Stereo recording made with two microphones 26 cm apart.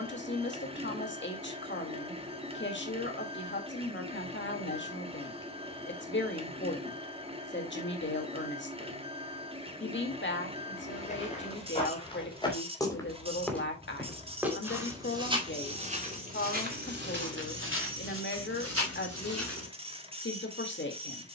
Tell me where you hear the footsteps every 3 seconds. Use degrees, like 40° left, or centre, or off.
off, off, off, 30° left, centre, 30° right, 60° right.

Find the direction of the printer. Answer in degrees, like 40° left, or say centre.
20° right.